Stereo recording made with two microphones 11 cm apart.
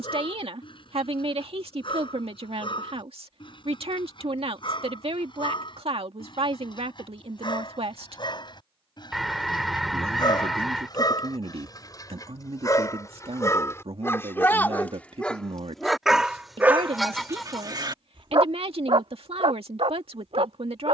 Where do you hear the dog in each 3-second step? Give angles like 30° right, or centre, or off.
50° left, 50° left, 50° left, 40° left, 30° left, 20° right, 70° right.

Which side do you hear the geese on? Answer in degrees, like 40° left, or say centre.
centre.